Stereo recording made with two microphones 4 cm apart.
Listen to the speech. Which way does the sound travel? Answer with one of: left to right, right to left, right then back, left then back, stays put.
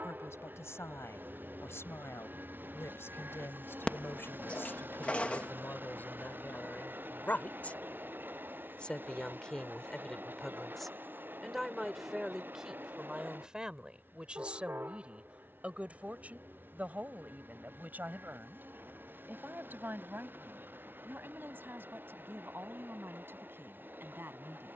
left to right.